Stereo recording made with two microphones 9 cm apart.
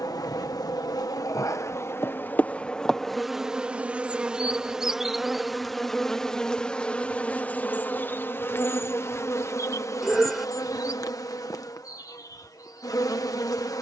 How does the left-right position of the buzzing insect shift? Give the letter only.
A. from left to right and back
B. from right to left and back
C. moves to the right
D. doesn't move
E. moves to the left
A.